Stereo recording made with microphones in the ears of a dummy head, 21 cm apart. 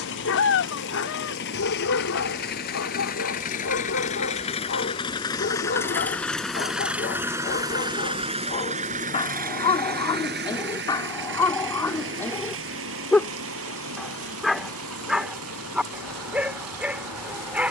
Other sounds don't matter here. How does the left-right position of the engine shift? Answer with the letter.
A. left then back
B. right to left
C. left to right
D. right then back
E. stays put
C.